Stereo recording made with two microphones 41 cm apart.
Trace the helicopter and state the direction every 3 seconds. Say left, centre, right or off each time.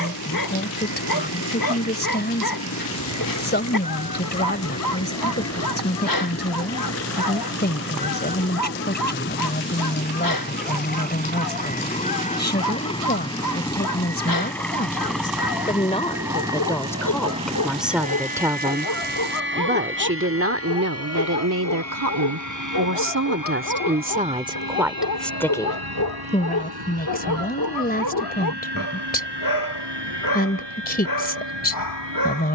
left, left, left, left, centre, centre, right, right, right, right, right.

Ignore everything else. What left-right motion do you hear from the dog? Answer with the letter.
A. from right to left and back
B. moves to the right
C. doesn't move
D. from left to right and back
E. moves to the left
C.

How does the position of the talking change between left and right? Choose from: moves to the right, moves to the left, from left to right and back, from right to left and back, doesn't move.
from left to right and back.